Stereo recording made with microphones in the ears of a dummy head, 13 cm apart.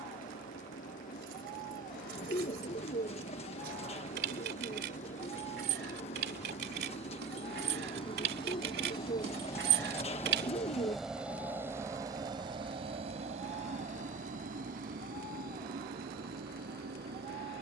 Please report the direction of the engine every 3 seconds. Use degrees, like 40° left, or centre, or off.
60° left, 60° left, 40° left, 10° left, 50° right, 80° right.